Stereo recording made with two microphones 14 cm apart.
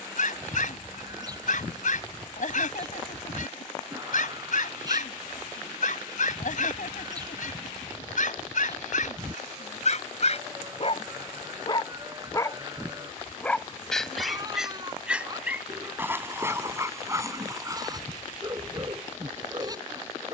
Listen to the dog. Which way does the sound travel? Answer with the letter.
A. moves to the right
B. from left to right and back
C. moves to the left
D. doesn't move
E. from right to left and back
A.